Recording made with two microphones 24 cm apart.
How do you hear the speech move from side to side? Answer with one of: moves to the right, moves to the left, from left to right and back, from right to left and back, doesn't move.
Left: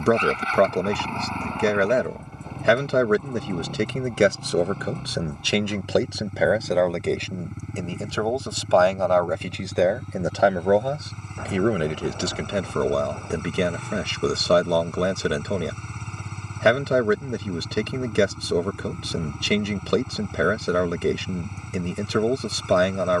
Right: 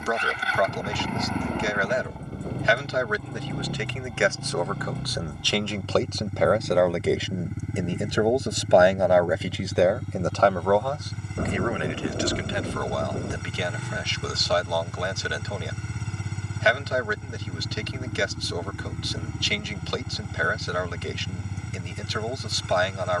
from left to right and back.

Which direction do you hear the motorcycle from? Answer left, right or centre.
centre.